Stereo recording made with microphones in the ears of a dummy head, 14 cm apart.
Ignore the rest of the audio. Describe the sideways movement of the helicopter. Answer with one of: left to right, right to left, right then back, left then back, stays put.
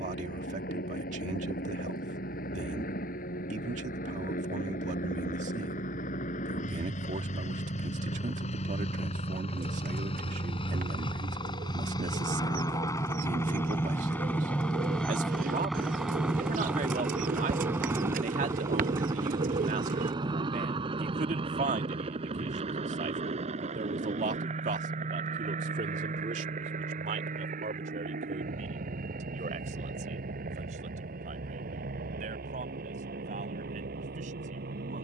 left to right.